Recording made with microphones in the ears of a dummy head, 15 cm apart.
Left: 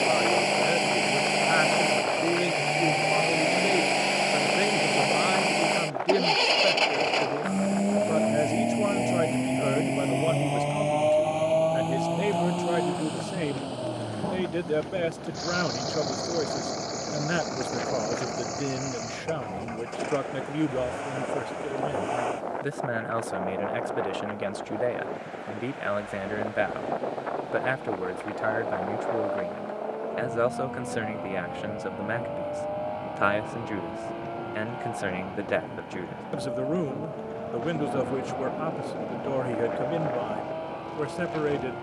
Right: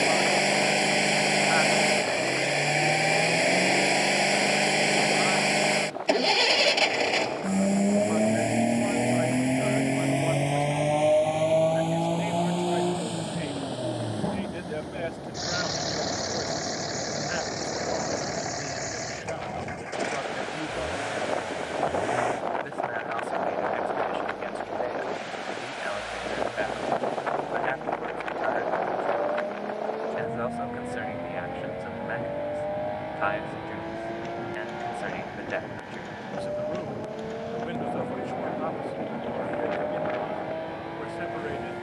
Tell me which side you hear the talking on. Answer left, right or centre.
left.